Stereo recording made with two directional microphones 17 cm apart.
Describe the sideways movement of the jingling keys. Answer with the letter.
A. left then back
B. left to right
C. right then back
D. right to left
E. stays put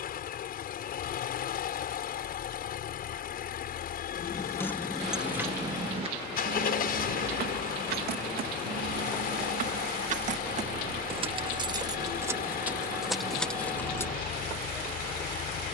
C.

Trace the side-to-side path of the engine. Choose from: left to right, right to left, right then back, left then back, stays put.
stays put.